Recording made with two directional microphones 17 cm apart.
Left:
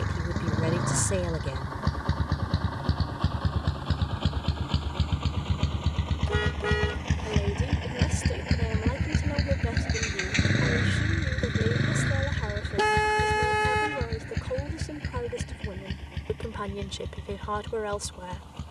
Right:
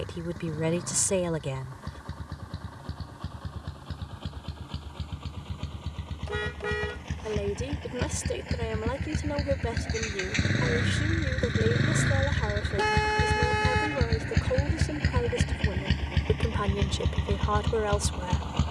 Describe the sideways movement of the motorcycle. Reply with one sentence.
You can hear the motorcycle move to the right.